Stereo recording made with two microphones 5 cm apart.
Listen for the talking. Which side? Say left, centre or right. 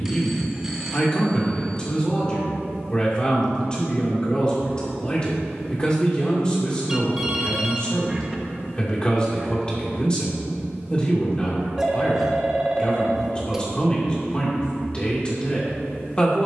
left.